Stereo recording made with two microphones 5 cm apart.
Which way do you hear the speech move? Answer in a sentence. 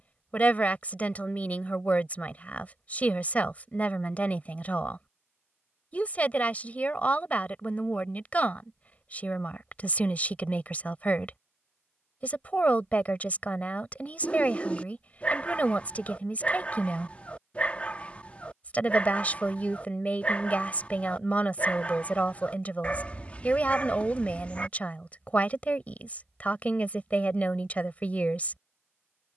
In this clip you hear the speech stay put.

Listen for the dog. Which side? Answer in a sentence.
You can hear the dog on the left.